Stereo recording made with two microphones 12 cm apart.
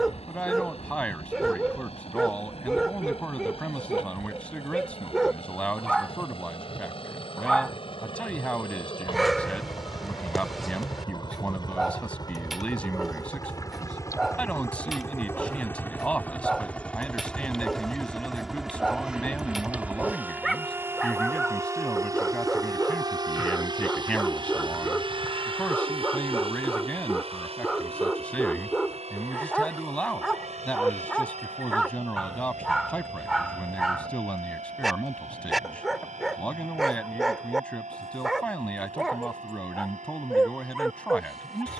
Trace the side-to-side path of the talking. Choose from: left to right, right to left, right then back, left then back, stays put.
stays put.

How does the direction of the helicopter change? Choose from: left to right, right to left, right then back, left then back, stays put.
left to right.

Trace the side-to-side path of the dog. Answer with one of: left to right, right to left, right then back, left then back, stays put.
stays put.